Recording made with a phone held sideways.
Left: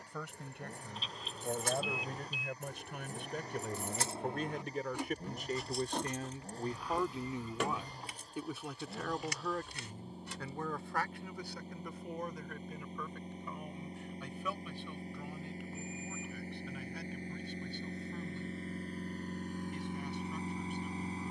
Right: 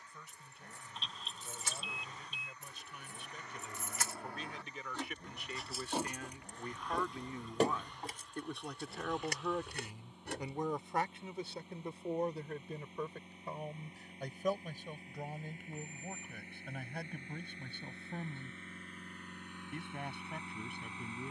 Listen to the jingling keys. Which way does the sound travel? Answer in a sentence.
In this clip you hear the jingling keys move to the right.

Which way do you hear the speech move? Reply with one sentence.
In this clip you hear the speech go from the left side to the right.